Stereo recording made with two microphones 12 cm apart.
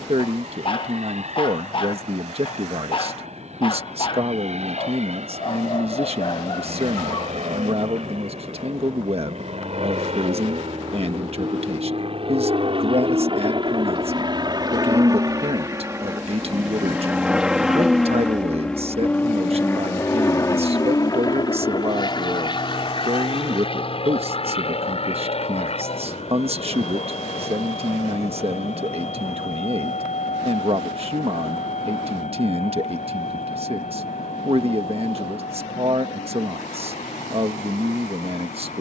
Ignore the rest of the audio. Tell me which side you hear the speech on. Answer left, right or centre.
right.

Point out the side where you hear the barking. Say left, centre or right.
left.